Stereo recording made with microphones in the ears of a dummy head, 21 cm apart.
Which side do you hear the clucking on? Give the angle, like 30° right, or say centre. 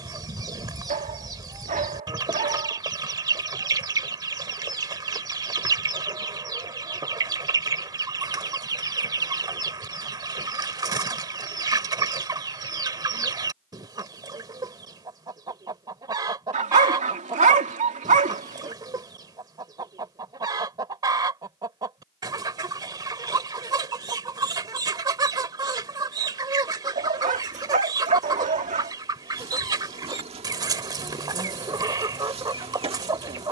20° right.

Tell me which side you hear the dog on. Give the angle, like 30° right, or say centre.
30° right.